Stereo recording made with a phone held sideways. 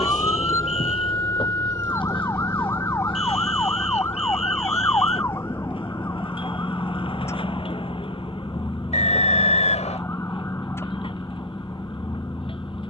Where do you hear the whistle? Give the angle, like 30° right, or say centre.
50° left.